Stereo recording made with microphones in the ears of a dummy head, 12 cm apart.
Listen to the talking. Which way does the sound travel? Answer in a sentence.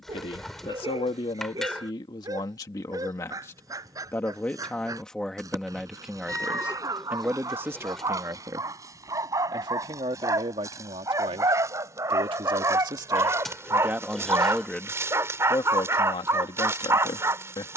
You can hear the talking go right and come back.